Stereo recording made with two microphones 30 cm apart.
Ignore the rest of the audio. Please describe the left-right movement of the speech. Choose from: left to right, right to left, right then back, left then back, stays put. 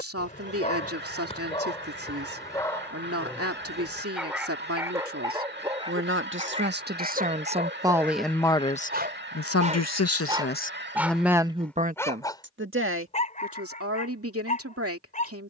left then back.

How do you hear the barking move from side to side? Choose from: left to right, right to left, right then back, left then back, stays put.
right then back.